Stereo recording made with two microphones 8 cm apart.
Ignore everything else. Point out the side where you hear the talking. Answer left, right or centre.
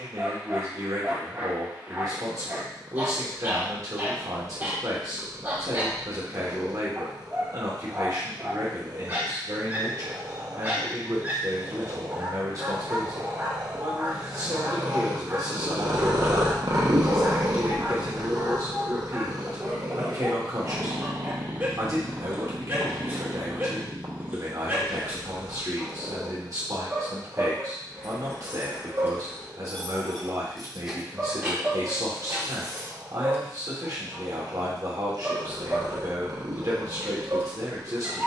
right.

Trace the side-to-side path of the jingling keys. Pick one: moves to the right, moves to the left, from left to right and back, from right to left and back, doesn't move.
moves to the right.